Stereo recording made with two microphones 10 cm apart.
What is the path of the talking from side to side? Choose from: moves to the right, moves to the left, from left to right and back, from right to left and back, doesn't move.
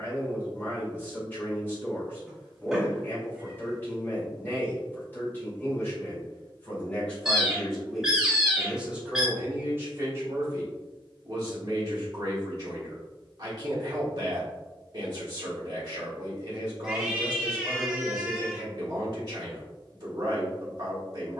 moves to the right.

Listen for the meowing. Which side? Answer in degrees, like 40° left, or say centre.
10° right.